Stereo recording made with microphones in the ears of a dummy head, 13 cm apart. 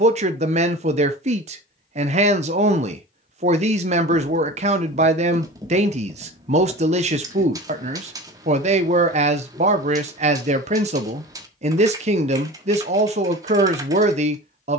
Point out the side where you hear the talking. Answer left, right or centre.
right.